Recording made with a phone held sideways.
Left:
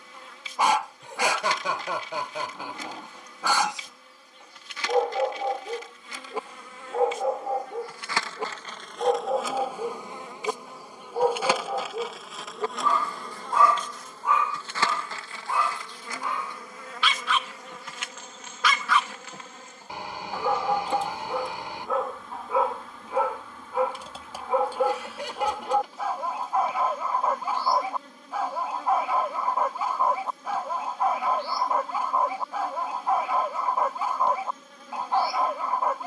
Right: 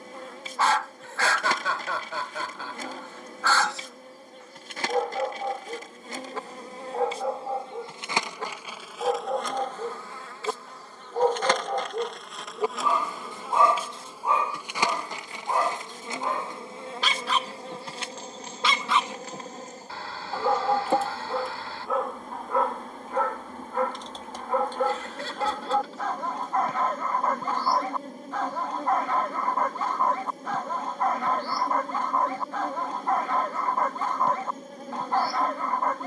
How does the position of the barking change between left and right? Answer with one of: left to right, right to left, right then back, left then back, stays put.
right then back.